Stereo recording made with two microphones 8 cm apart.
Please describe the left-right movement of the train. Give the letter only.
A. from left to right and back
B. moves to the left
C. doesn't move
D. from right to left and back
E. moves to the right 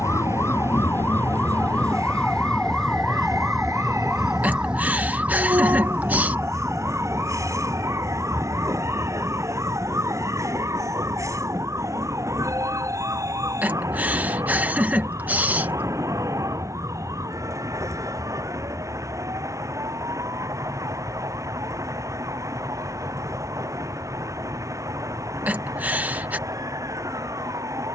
C.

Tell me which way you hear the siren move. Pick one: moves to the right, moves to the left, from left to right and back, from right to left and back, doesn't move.
moves to the right.